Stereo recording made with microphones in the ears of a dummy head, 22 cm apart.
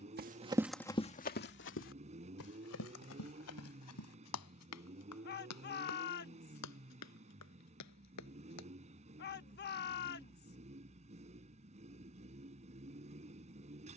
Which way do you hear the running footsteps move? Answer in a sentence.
You can hear the running footsteps travel towards the left.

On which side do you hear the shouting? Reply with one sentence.
You can hear the shouting on the left.